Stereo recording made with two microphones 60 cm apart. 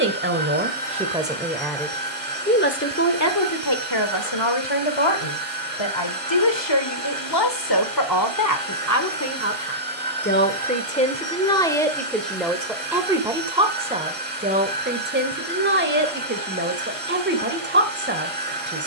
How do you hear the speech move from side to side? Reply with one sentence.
You can hear the speech go left and come back.